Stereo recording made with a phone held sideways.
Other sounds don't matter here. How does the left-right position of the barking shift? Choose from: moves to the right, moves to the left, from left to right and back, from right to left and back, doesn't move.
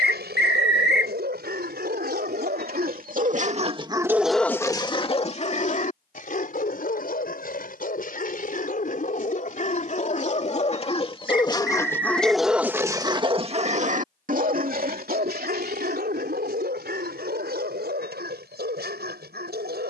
from right to left and back.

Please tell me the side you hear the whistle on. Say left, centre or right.
left.